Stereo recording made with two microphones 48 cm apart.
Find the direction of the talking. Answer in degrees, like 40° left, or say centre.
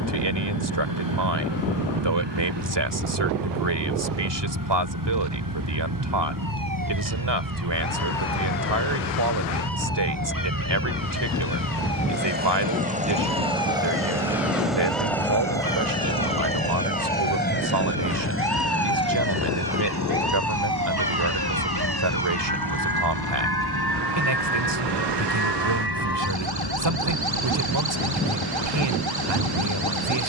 60° right.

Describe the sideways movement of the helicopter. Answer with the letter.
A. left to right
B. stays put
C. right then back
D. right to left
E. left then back
D.